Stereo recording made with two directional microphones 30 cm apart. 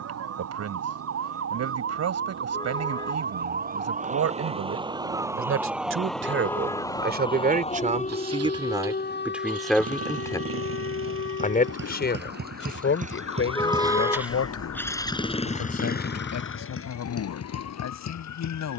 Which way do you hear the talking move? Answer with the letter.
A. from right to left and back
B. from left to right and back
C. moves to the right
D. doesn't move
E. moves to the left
E.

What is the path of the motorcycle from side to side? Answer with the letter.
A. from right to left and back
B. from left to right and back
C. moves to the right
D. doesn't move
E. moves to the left
E.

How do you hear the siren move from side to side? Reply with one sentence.
In this clip you hear the siren travel towards the left.